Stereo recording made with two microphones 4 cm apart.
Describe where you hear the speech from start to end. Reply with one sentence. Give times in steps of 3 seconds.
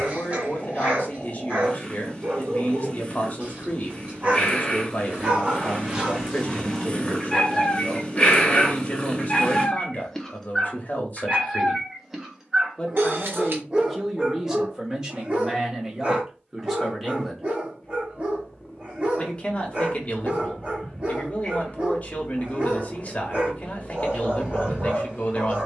You can hear the speech on the left from 0 s, in the centre from 12 s and on the left from 18 s.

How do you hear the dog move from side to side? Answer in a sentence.
You can hear the dog move from right to left and back again.